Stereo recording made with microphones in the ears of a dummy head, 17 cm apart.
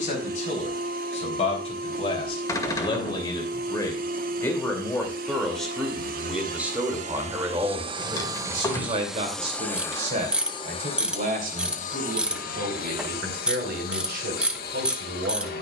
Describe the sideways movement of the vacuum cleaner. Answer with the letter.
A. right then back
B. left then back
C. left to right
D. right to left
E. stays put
D.